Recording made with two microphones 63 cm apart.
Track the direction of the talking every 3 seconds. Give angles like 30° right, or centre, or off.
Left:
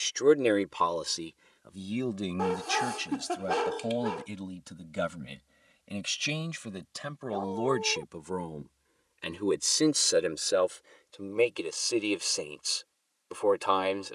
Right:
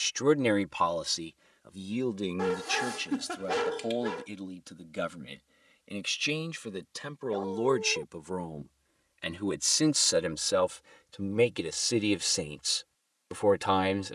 10° right, 20° left, 10° left, 30° right, 50° right.